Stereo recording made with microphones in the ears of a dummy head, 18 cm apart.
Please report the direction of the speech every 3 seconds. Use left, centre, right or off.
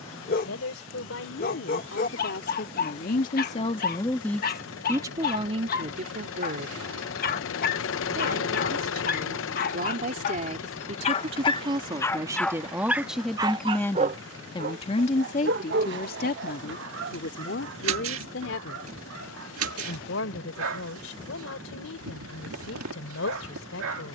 left, centre, right, right, centre, left, left, left.